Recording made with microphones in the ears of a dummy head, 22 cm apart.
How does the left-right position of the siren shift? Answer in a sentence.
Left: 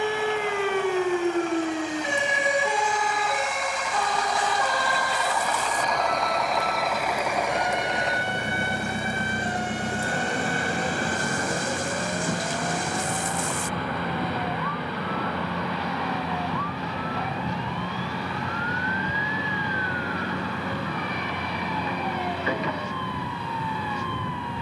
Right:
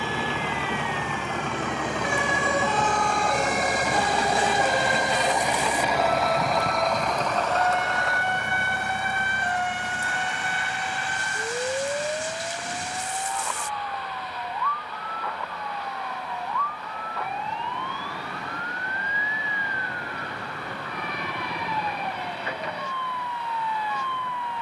You can hear the siren move to the right.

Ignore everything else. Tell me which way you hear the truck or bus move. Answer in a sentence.
In this clip you hear the truck or bus travel towards the left.